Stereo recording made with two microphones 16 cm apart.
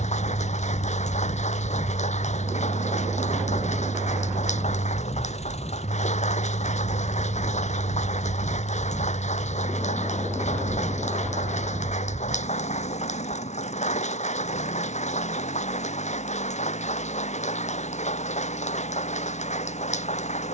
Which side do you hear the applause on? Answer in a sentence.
In this clip you hear the applause on the left.